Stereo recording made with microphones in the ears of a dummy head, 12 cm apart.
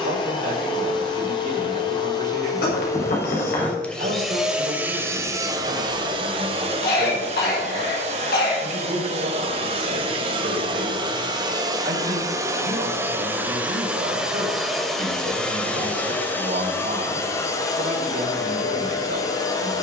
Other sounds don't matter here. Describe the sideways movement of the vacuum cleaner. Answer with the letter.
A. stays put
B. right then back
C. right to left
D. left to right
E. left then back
B.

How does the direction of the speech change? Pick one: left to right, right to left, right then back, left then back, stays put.
stays put.